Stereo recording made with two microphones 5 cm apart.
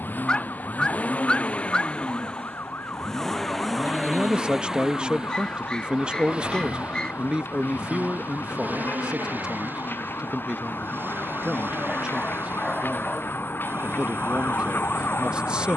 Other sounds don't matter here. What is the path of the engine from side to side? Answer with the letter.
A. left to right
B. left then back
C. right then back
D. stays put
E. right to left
A.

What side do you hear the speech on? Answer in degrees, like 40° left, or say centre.
20° right.